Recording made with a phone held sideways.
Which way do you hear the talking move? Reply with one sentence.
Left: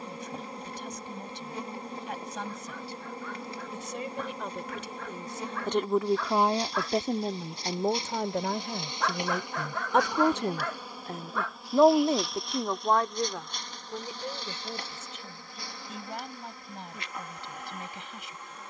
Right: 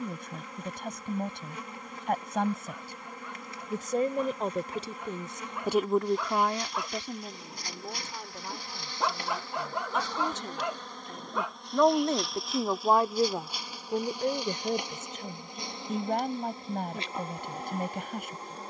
In this clip you hear the talking move from right to left and back again.